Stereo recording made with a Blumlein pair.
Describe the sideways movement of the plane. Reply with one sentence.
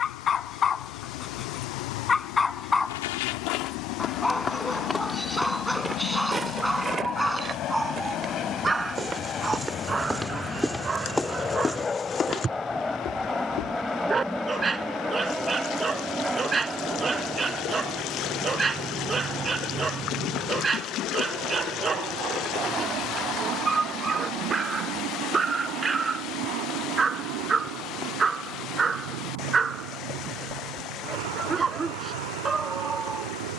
In this clip you hear the plane go from the left side to the right.